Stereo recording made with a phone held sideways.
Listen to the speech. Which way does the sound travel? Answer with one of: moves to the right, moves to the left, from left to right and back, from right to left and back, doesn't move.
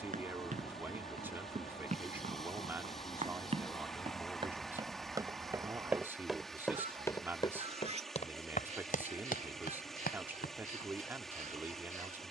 doesn't move.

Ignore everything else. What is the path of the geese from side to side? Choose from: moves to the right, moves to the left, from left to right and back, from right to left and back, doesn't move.
moves to the right.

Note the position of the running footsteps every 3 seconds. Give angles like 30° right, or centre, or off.
50° right, 30° right, 30° left, 70° left.